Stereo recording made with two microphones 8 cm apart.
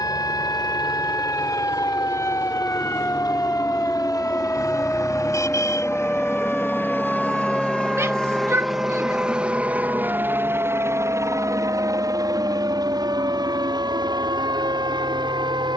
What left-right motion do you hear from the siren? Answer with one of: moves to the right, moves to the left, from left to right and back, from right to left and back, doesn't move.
moves to the right.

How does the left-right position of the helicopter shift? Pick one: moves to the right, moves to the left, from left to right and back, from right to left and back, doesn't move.
moves to the right.